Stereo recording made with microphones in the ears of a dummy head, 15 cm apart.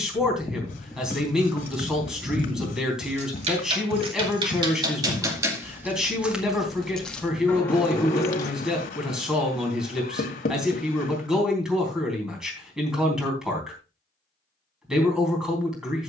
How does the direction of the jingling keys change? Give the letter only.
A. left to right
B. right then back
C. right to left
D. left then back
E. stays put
B.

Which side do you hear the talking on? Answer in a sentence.
You can hear the talking in the centre.